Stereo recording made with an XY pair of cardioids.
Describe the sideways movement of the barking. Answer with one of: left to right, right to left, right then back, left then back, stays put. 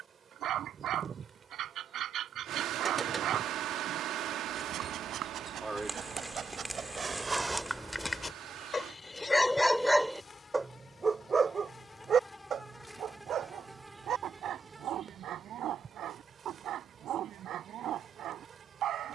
left then back.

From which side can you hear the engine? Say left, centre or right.
right.